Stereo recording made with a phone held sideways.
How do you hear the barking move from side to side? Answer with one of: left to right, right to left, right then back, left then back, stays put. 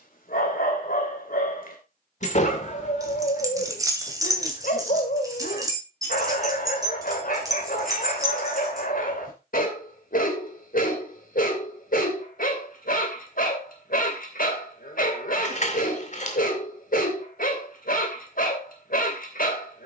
stays put.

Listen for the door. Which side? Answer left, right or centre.
left.